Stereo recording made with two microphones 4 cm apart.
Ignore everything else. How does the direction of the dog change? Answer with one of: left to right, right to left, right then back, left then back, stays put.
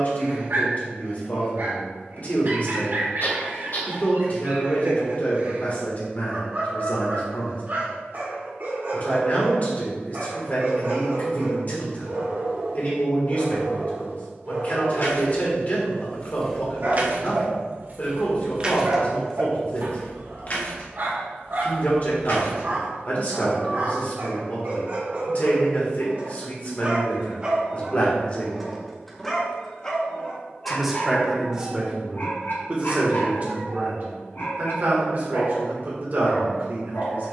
right to left.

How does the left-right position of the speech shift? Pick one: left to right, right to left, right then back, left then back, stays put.
left to right.